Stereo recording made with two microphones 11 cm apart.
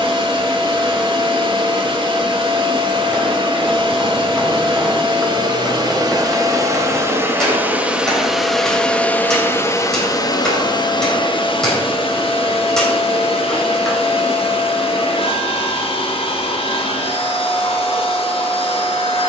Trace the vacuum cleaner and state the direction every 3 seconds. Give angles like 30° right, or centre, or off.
50° right, 50° right, 20° right, 40° left, 60° left, 60° left, 60° left.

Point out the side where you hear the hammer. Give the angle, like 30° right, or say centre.
centre.